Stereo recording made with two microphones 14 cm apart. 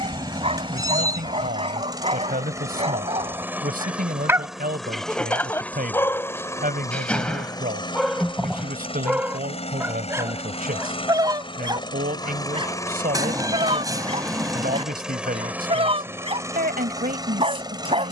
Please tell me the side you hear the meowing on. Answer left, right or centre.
right.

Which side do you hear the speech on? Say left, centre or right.
right.